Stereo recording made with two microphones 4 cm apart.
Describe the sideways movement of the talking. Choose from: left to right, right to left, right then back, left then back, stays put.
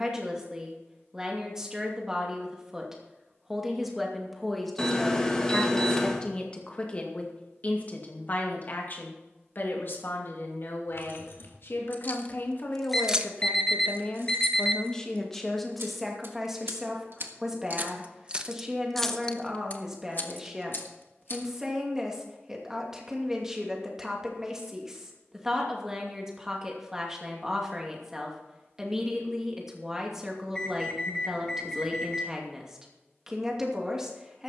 left then back.